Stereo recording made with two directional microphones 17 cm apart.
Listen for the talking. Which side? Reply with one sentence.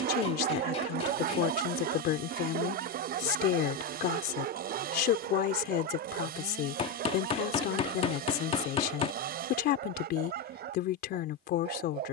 In this clip you hear the talking on the left.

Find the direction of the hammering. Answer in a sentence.
You can hear the hammering on the left.